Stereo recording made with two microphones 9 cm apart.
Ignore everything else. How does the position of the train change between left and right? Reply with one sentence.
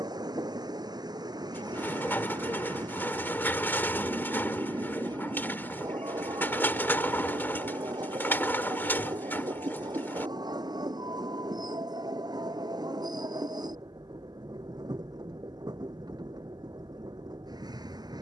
In this clip you hear the train stay in one place.